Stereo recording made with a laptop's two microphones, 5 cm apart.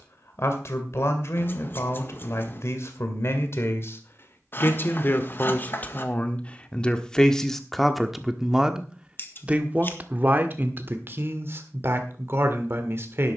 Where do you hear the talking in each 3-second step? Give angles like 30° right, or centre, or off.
60° left, 40° left, 10° left, 40° right, 50° right.